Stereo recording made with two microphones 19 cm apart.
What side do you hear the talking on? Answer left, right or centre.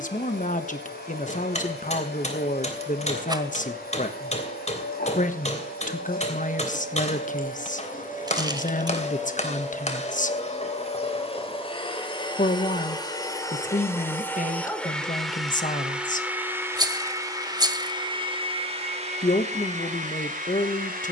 left.